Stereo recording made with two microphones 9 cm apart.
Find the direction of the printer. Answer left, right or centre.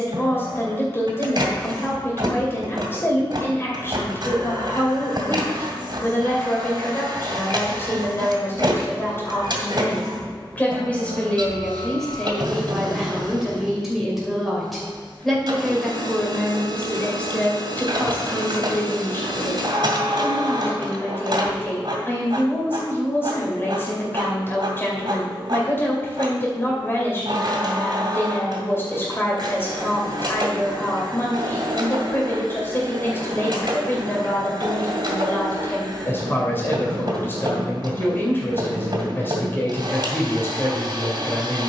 right.